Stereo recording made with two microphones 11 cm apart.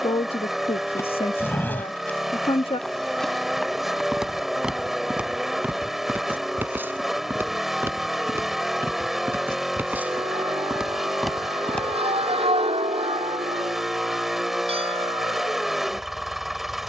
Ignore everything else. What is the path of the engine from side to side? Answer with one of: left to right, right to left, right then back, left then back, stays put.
stays put.